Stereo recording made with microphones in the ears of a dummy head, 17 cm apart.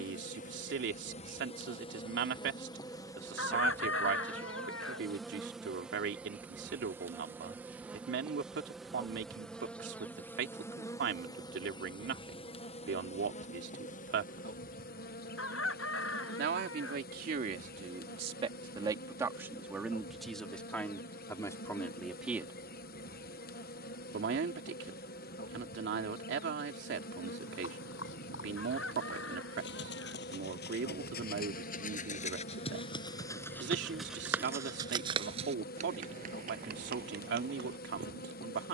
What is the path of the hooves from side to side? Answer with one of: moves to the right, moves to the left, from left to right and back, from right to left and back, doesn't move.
moves to the right.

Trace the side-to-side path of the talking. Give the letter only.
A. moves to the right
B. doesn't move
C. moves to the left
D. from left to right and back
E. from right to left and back
E.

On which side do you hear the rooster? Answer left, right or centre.
left.